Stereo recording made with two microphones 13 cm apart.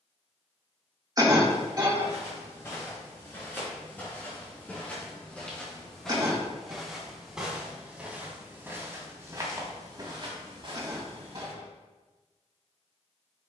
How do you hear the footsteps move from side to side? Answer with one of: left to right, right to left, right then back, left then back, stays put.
left to right.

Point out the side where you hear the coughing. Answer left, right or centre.
right.